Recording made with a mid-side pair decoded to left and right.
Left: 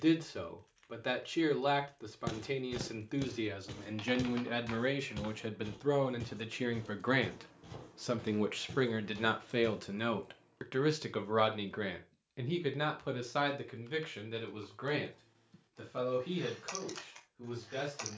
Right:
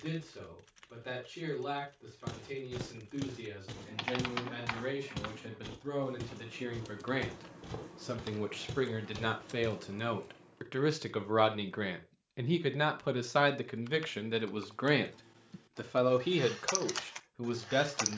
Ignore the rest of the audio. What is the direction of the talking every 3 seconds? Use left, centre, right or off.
left, left, left, centre, right, right.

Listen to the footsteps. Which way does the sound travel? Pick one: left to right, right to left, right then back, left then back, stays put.
left to right.